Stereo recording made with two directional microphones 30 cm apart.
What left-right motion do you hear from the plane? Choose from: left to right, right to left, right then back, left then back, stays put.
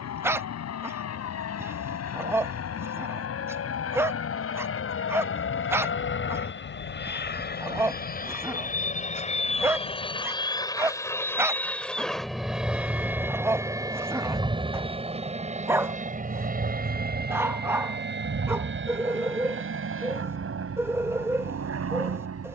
left to right.